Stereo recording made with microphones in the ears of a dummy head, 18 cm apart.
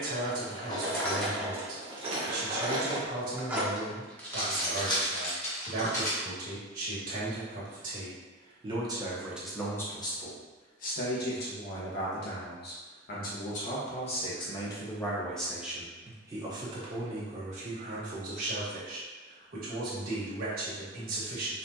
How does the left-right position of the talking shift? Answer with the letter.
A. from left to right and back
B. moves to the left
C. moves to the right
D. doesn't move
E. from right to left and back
E.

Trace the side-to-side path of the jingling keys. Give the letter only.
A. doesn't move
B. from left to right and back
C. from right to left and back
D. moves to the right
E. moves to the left
B.